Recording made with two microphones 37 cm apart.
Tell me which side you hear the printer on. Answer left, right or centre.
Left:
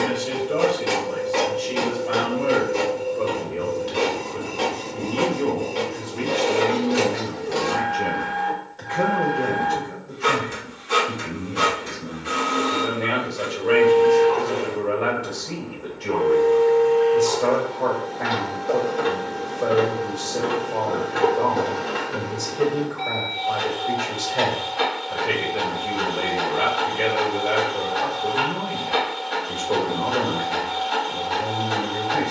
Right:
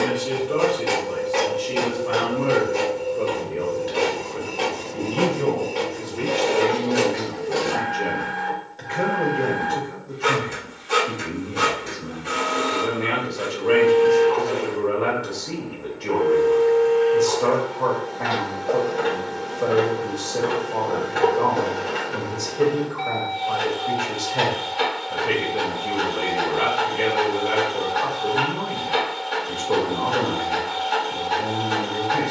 left.